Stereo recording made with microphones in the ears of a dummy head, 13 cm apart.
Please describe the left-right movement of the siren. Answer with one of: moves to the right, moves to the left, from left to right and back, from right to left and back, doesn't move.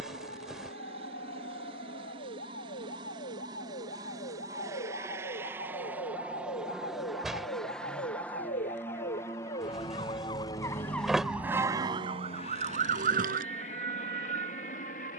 moves to the right.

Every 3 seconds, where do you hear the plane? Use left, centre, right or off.
right, right, centre, left, left.